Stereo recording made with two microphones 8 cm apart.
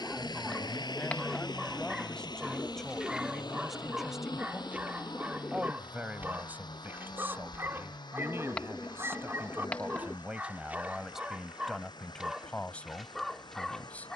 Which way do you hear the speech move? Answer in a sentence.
In this clip you hear the speech move from left to right and back again.